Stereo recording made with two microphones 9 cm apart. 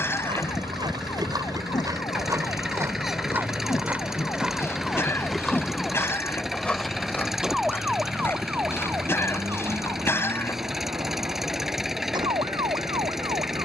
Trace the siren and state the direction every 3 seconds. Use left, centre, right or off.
left, left, centre, right, right.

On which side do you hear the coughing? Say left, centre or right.
left.